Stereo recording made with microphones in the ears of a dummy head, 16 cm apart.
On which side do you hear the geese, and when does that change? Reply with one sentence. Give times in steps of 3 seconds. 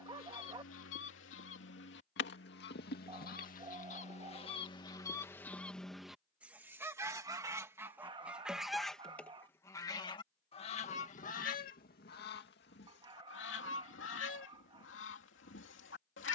In this clip you hear the geese on the left from 0 s, in the centre from 6 s and on the left from 9 s.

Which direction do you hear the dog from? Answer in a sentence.
You can hear the dog on the right.